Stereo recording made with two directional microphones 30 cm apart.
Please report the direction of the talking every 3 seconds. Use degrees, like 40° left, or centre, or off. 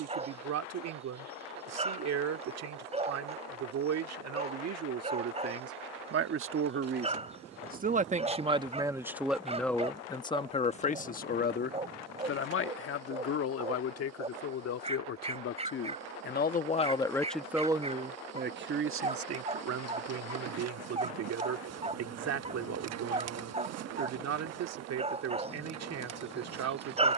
60° right, 60° right, 30° right, 20° left, 50° left, 20° left, 50° right, 60° right, 60° right.